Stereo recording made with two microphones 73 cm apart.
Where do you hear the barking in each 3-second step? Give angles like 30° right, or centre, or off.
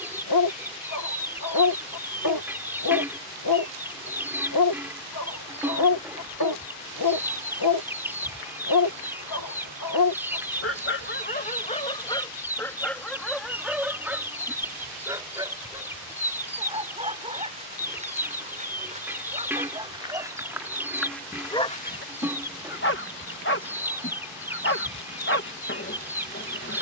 30° left, 30° left, 30° left, 20° left, centre, 10° right, 10° right, 10° left, 20° left.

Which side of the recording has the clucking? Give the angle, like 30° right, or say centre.
centre.